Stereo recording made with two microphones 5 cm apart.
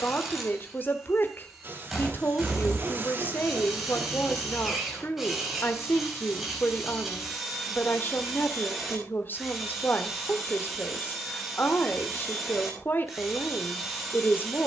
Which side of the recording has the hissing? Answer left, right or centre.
right.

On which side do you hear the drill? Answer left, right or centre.
centre.